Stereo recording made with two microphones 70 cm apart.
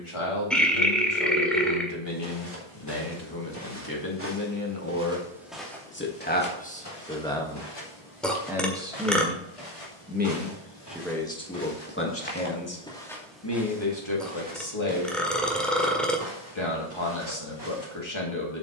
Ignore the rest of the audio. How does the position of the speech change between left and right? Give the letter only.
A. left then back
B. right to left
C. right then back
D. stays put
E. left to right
C.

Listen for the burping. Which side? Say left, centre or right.
centre.